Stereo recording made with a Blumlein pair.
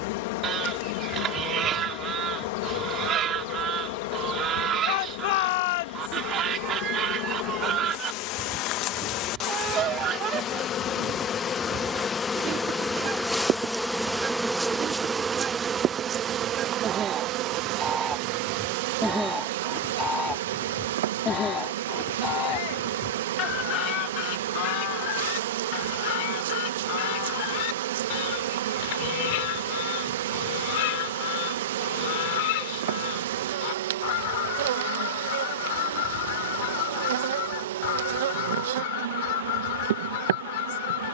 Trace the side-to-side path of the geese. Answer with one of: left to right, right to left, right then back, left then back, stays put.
right to left.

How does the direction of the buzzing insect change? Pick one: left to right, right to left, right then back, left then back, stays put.
left to right.